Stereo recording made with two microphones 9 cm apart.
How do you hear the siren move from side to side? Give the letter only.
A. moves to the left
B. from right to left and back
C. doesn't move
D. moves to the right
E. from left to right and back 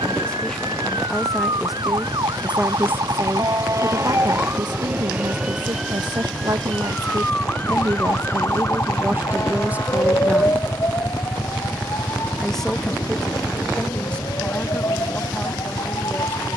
A.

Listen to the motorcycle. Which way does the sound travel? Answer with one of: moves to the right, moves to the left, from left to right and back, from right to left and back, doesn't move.
moves to the left.